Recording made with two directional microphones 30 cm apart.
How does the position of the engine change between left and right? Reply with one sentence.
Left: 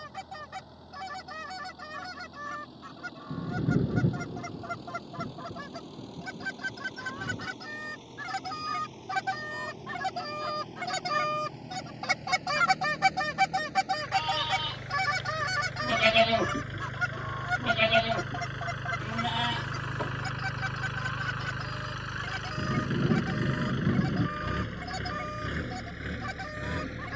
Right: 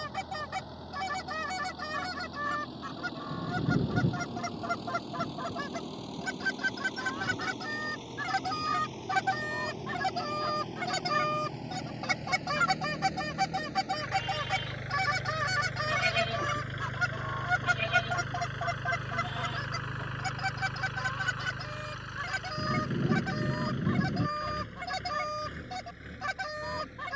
In this clip you hear the engine go from the right side to the left.